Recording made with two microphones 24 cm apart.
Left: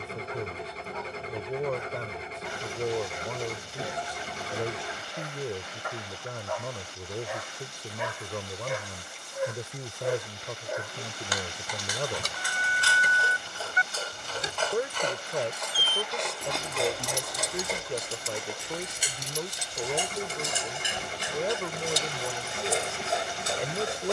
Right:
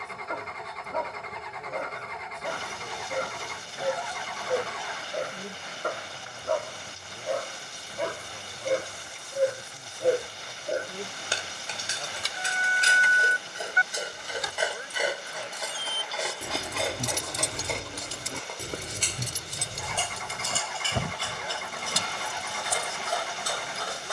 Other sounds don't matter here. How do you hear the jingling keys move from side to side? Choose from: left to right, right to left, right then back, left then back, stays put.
left to right.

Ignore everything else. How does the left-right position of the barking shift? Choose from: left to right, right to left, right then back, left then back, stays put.
right to left.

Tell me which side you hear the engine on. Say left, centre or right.
left.